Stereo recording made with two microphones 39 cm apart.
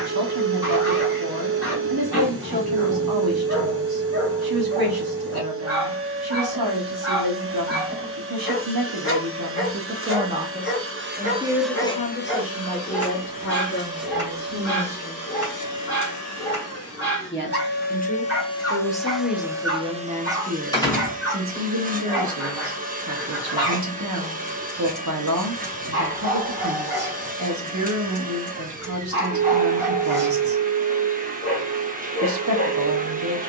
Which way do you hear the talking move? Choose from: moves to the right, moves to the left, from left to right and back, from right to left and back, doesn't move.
from right to left and back.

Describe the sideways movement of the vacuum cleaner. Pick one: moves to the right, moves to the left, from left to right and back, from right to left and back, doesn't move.
from right to left and back.